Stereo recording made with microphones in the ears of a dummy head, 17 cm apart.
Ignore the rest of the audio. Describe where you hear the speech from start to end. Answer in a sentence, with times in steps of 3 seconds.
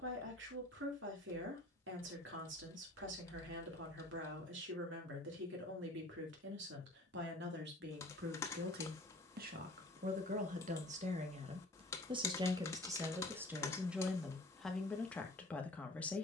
In this clip you hear the speech on the right from 0 s and in the centre from 12 s.